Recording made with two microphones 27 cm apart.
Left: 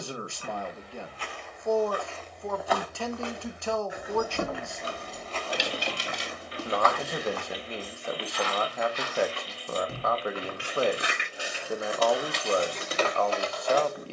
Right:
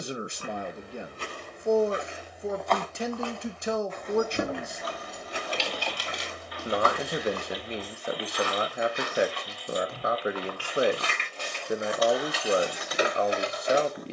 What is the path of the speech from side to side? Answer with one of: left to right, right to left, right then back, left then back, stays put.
stays put.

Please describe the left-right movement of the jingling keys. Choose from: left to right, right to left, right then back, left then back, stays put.
left then back.